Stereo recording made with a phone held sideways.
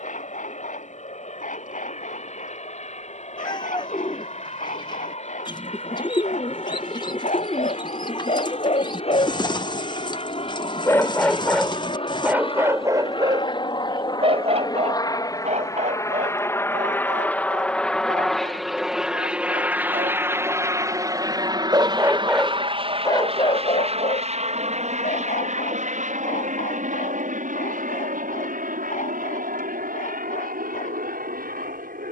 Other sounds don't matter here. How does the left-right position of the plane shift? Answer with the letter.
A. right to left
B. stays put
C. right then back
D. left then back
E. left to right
E.